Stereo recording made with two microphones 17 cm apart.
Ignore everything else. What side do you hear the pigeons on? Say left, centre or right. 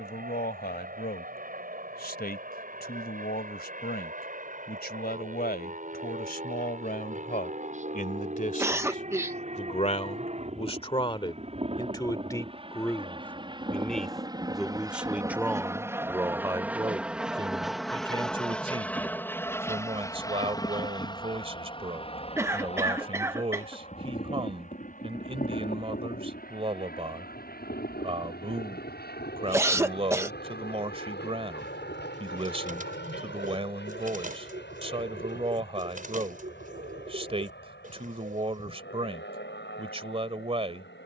right.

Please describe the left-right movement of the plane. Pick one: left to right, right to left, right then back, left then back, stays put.
right to left.